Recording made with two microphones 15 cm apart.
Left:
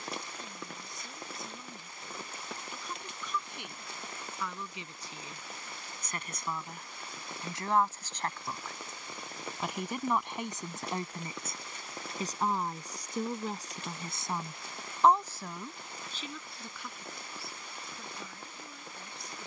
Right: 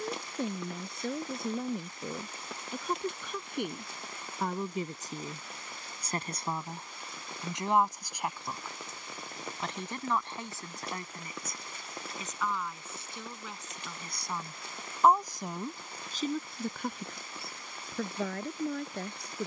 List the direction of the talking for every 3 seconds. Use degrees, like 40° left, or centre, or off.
60° right, 50° right, 20° right, 20° left, 30° left, 40° right, 70° right.